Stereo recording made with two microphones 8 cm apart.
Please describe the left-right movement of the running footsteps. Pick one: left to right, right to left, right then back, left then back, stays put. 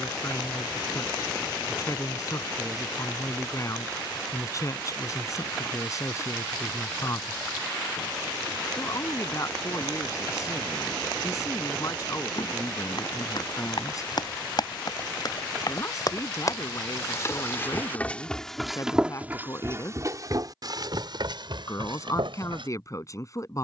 left to right.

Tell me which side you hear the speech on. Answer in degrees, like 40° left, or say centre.
40° left.